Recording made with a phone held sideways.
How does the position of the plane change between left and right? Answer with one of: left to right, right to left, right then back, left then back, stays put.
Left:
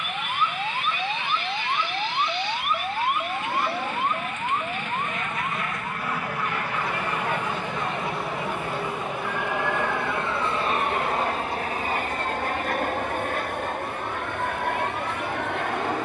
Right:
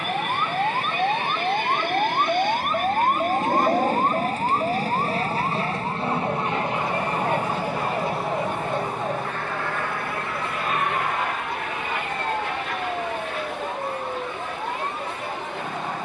right to left.